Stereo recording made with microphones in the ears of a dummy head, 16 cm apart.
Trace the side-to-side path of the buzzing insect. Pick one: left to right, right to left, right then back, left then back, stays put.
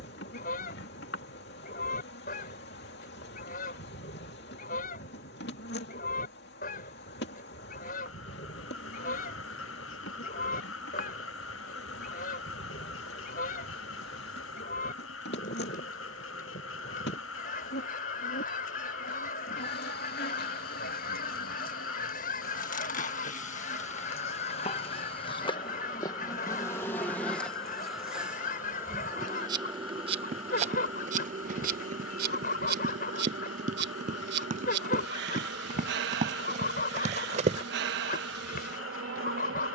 left to right.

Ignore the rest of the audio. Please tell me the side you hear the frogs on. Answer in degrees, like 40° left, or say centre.
70° left.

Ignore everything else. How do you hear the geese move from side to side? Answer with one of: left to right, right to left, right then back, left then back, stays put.
stays put.